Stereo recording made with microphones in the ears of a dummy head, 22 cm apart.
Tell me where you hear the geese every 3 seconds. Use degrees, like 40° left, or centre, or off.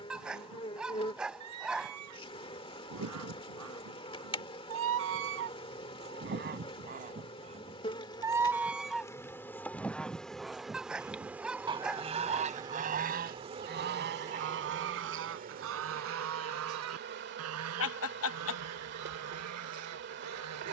80° right, 60° right, 30° right, 10° right, 40° right, 60° right, 80° right.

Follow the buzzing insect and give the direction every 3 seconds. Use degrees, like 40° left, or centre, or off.
20° left, 20° left, 20° left, centre, 20° right, 40° right, 50° right.